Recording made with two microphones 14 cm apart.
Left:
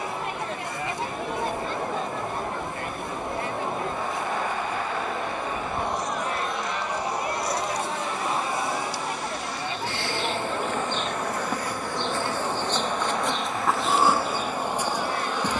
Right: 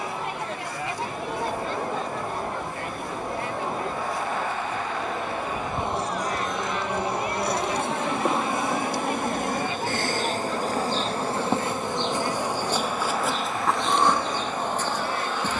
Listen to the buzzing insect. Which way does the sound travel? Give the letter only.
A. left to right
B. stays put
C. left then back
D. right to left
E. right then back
E.